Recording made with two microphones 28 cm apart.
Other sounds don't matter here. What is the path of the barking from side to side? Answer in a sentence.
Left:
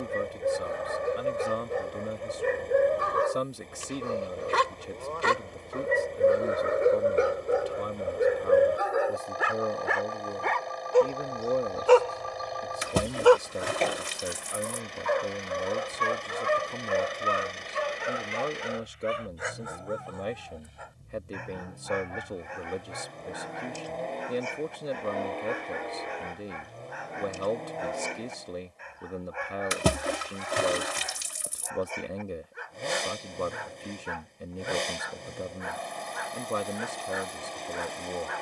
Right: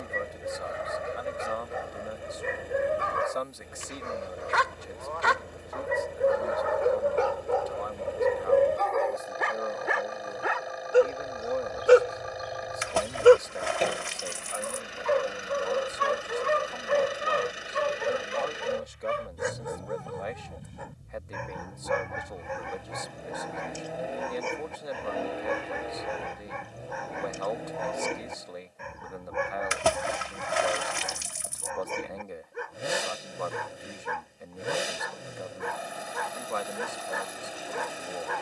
In this clip you hear the barking travel towards the right.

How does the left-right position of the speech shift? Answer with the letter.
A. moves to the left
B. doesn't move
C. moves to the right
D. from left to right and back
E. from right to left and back
B.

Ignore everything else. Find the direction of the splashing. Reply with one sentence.
In this clip you hear the splashing on the left.